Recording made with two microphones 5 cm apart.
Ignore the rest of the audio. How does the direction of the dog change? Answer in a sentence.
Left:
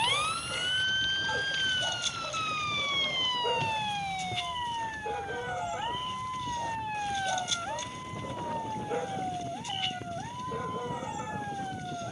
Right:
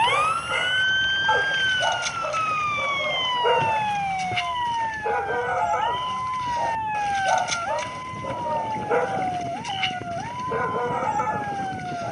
In this clip you hear the dog stay in one place.